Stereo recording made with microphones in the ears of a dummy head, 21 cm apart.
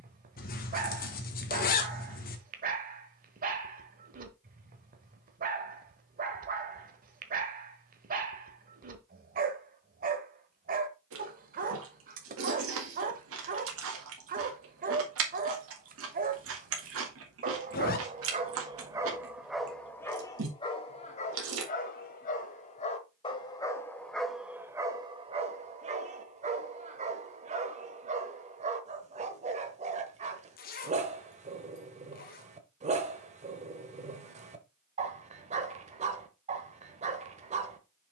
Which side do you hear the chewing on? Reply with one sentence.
In this clip you hear the chewing on the right.